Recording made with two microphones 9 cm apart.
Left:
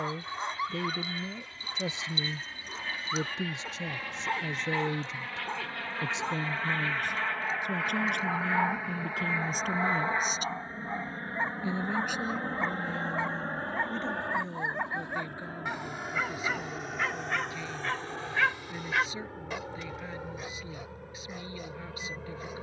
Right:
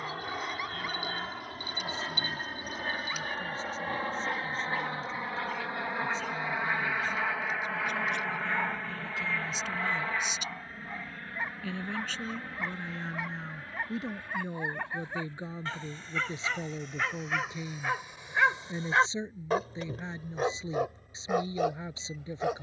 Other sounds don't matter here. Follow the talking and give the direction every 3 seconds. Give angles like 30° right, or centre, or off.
70° left, 70° left, 70° left, 40° left, centre, 20° right, 30° right, 30° right.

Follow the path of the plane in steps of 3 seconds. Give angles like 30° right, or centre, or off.
50° right, 30° right, centre, 20° left, 40° left, 60° left, 70° left, 70° left.